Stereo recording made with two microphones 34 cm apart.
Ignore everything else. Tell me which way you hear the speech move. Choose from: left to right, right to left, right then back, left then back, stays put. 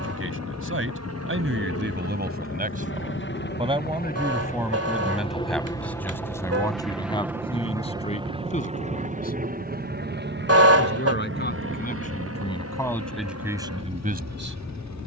left then back.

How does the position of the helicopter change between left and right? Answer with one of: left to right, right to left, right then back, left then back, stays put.
left to right.